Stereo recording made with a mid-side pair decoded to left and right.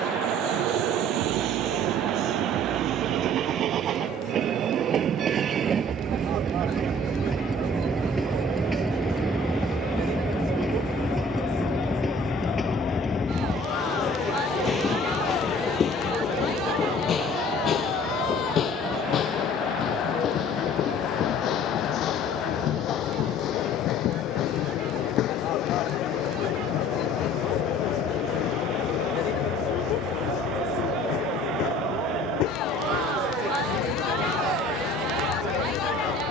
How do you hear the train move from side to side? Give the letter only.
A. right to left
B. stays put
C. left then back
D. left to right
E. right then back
A.